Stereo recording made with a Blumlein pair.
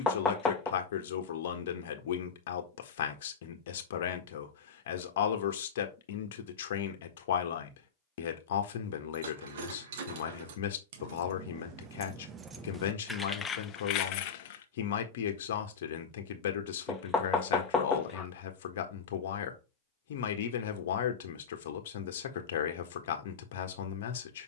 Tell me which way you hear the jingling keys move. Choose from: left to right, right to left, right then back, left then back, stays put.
right to left.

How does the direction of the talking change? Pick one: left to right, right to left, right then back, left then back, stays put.
stays put.